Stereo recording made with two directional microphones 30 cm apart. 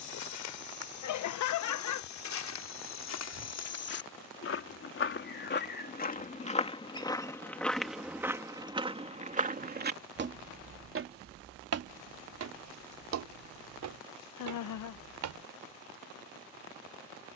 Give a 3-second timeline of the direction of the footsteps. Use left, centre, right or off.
left, left, centre, right, right, right.